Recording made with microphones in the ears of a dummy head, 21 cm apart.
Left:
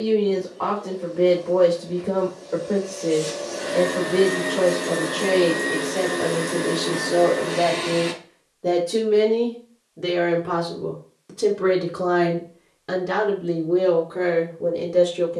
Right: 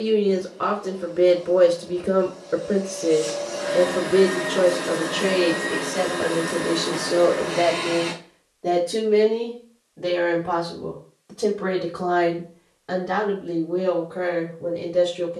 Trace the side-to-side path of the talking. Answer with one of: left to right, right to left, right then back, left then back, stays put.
right to left.